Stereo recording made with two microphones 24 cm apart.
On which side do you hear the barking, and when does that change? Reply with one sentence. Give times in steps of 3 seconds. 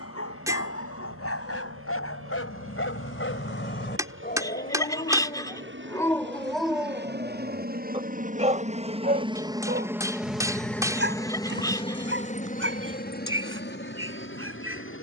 You can hear the barking on the left from 0 s, in the centre from 6 s and on the right from 9 s.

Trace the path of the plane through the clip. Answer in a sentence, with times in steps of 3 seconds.
You can hear the plane on the right from 0 s, in the centre from 9 s and on the left from 12 s.